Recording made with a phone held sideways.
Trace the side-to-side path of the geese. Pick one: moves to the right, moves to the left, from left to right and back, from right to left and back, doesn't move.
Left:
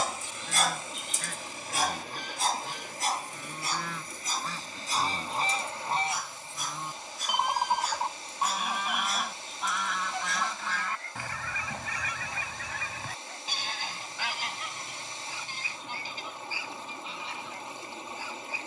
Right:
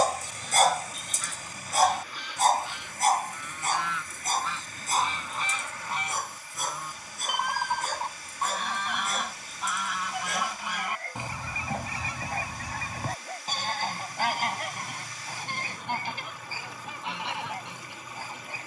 moves to the right.